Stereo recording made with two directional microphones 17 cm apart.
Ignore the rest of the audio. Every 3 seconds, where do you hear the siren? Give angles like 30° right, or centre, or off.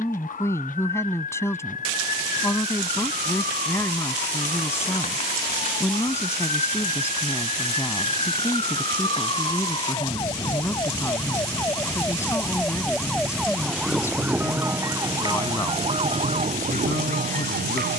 50° left, 40° left, 40° left, 20° left, centre, 40° right.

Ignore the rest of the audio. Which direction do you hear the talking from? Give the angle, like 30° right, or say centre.
10° left.